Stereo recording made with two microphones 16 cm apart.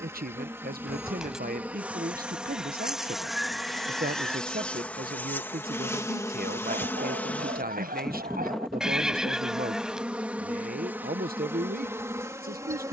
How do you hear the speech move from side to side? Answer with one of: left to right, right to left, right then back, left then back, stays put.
stays put.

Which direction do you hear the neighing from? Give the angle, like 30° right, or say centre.
centre.